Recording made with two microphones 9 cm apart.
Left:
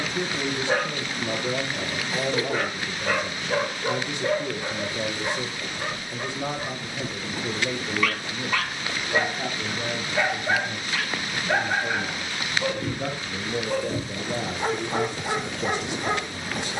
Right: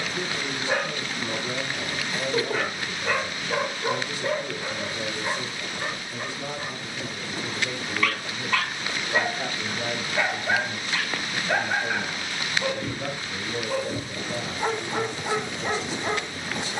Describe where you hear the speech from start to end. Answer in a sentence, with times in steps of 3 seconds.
You can hear the speech on the left from 0 s, in the centre from 9 s and on the left from 12 s.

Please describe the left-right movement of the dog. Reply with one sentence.
In this clip you hear the dog stay in one place.